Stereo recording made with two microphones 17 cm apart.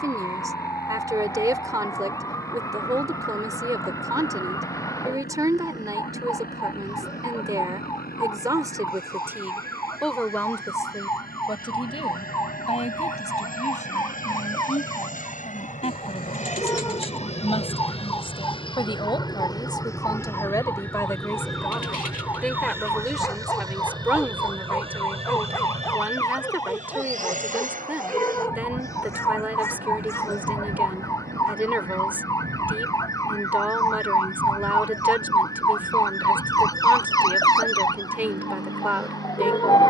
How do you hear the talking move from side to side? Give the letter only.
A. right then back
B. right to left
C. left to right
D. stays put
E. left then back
E.